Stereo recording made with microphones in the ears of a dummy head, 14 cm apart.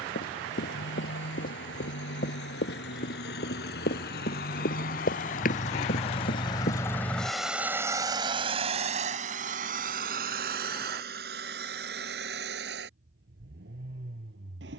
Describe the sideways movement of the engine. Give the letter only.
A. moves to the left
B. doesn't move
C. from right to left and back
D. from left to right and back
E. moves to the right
E.